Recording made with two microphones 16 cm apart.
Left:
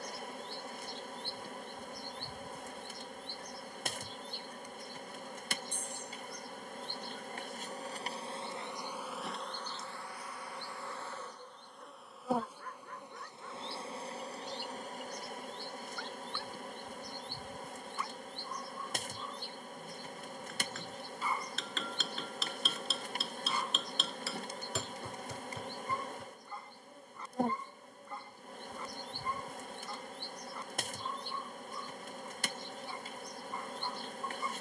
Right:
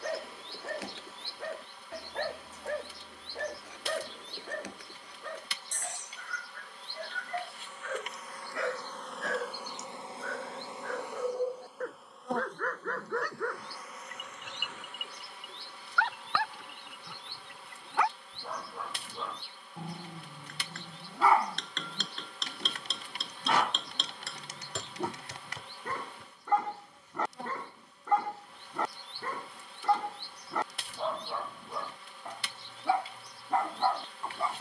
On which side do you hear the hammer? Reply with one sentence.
In this clip you hear the hammer in the centre.